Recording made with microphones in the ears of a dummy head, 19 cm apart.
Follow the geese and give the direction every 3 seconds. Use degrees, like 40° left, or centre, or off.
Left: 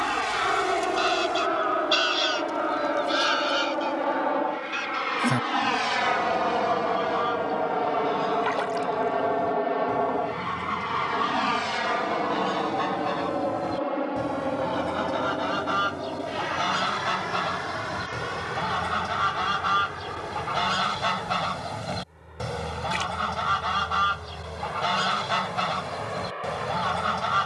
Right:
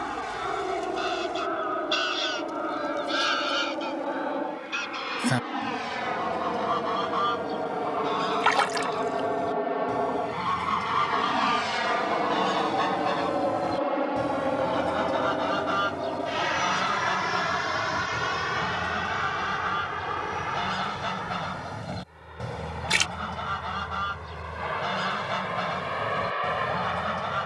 20° left, 10° right, 30° right, 30° right, 10° right, 10° left, 30° left, 30° left, 30° left.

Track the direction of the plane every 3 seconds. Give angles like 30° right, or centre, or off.
60° left, 50° left, 30° left, 10° left, 20° right, 30° right, 40° right, 50° right, 50° right.